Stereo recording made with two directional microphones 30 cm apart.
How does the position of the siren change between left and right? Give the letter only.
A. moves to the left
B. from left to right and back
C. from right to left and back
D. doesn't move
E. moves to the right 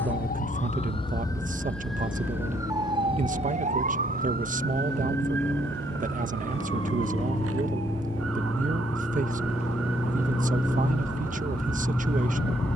E.